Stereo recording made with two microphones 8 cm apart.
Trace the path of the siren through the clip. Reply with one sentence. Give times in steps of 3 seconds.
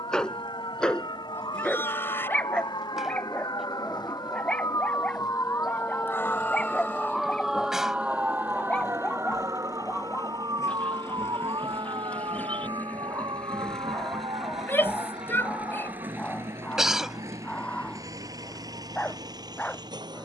You can hear the siren on the left from 0 s, in the centre from 6 s and on the right from 9 s.